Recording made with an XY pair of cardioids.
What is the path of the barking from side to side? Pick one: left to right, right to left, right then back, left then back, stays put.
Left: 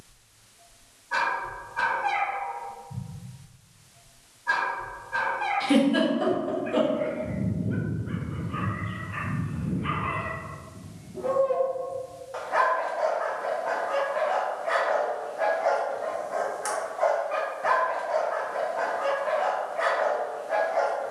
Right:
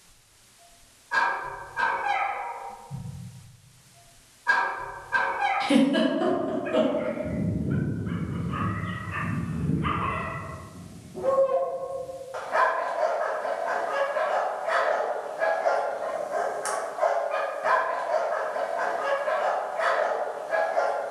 right then back.